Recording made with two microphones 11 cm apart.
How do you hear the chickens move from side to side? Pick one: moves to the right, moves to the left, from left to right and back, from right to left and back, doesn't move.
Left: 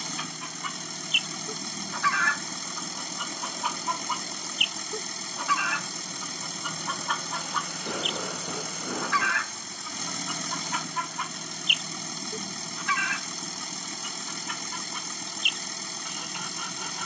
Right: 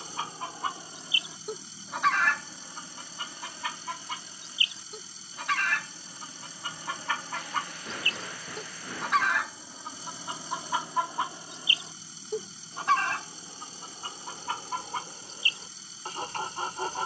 from right to left and back.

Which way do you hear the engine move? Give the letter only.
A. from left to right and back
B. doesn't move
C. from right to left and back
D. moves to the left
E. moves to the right
B.